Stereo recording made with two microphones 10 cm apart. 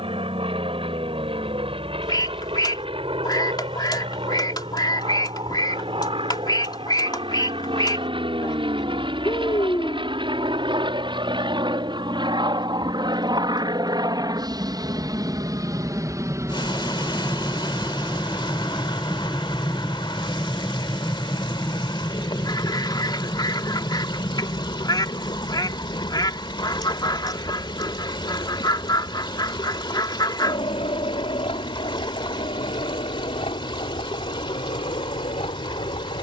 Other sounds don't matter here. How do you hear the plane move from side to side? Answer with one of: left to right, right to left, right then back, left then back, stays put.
right to left.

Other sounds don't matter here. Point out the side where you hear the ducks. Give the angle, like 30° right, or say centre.
40° left.